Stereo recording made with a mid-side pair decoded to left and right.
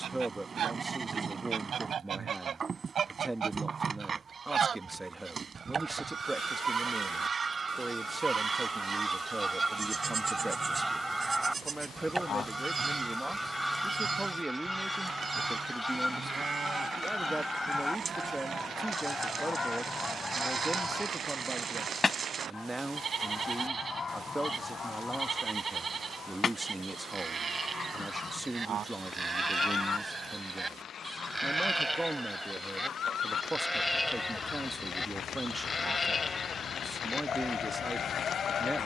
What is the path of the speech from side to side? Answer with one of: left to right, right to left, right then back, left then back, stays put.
stays put.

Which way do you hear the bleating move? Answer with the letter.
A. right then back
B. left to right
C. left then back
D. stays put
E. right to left
E.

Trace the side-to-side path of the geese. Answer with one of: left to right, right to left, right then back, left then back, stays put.
right to left.